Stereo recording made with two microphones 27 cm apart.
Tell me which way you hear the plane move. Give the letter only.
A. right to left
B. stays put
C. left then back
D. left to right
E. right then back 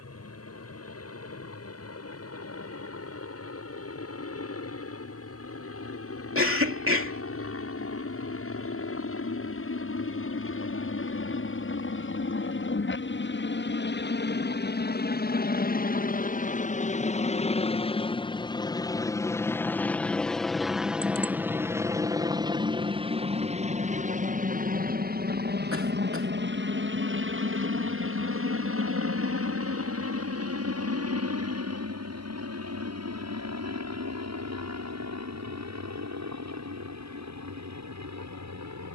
D.